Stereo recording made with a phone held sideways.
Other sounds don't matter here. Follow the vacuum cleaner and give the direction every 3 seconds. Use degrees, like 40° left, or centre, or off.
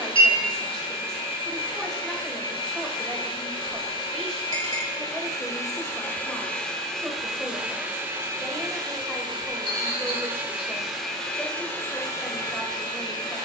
30° left, 30° left, 10° right, 10° right, 30° left.